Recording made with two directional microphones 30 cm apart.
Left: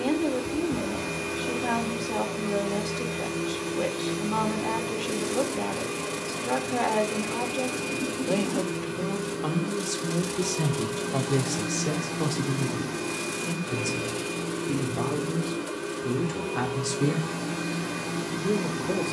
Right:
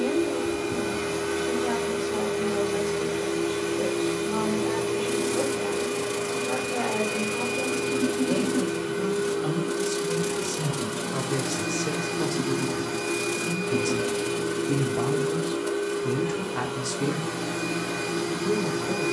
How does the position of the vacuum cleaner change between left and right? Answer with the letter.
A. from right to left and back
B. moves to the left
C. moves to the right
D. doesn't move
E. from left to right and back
D.